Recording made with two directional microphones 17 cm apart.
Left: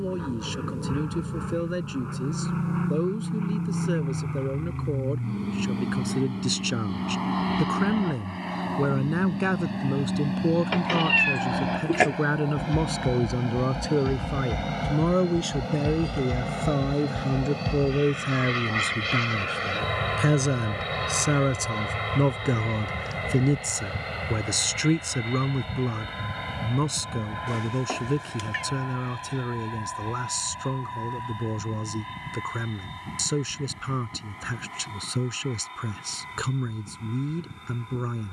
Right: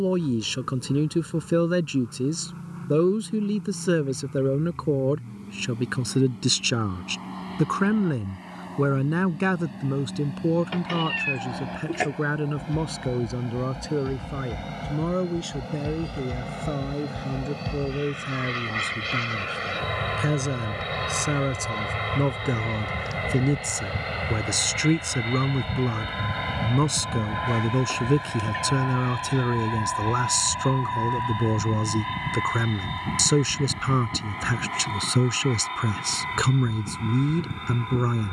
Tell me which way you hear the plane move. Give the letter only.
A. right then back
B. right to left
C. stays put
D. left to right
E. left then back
D.